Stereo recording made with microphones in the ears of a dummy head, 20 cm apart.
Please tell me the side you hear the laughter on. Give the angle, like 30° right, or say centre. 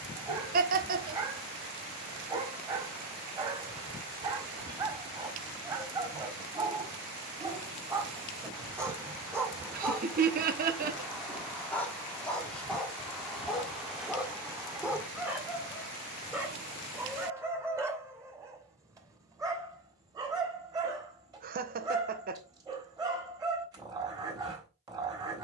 40° right.